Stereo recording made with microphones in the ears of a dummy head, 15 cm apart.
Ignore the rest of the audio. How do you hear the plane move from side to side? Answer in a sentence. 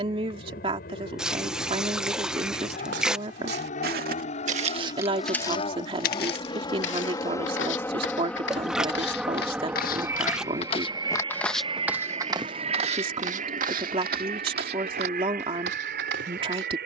You can hear the plane travel towards the right.